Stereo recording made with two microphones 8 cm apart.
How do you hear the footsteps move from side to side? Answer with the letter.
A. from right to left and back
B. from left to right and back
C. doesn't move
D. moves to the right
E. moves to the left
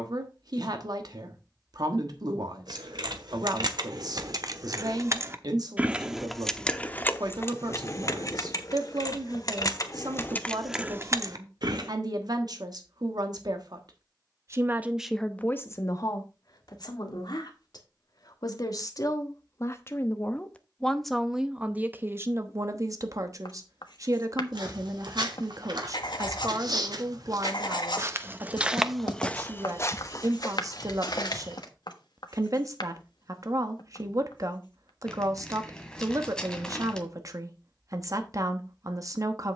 E.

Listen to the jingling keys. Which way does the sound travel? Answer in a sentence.
You can hear the jingling keys move from right to left and back again.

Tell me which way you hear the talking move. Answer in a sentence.
In this clip you hear the talking go left and come back.